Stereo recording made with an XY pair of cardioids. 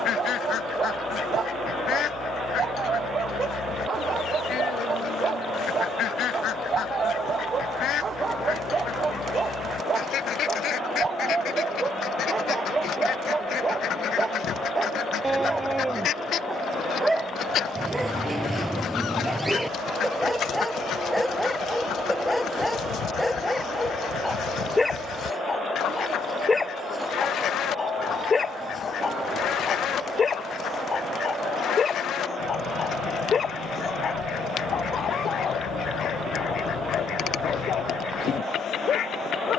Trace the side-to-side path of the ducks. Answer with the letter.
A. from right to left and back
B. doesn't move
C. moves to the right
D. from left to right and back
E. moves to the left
B.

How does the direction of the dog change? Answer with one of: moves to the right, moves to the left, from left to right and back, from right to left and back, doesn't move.
moves to the left.